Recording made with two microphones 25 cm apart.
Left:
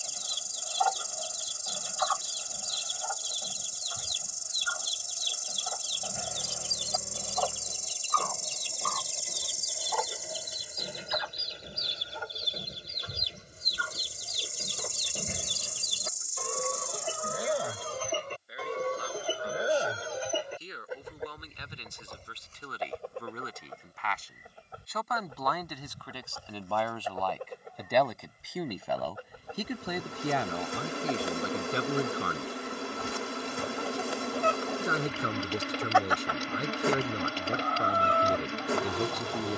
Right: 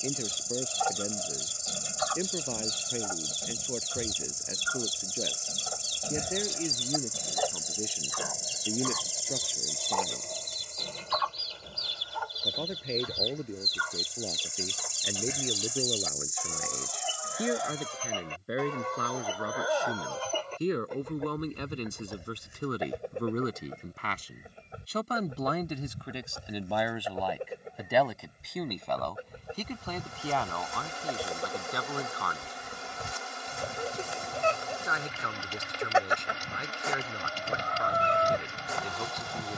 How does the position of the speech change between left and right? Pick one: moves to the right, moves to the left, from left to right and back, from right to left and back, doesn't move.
moves to the left.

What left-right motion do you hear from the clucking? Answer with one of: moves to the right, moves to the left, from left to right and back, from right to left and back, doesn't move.
from right to left and back.